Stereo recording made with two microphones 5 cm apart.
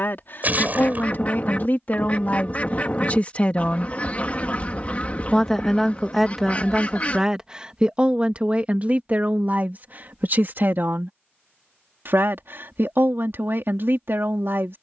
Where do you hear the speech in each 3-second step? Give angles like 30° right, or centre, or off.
40° left, 20° left, 20° right, 40° right, 60° right.